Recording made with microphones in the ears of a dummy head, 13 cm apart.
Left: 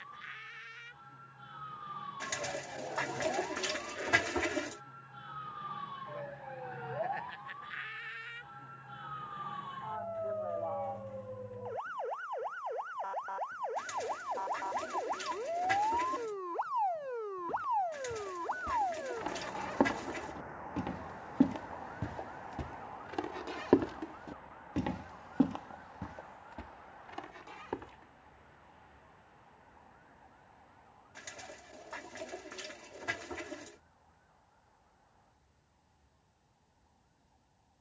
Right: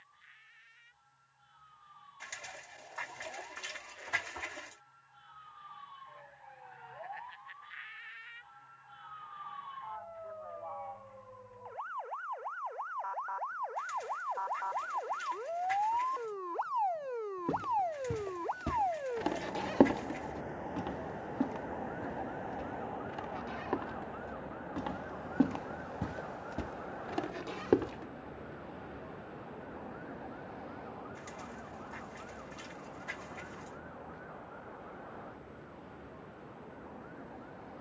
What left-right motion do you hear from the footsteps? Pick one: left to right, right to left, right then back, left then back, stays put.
left then back.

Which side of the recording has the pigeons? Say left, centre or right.
left.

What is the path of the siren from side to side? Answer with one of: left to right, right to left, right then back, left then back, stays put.
left to right.